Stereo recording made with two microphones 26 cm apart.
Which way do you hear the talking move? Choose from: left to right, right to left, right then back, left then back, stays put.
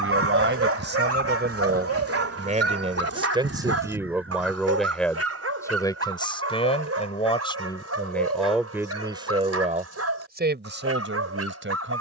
left then back.